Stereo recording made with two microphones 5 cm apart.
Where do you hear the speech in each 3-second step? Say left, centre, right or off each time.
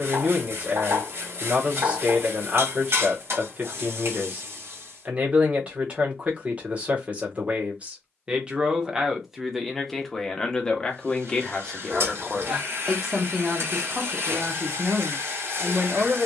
right, right, right, centre, centre, right.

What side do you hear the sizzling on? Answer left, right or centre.
right.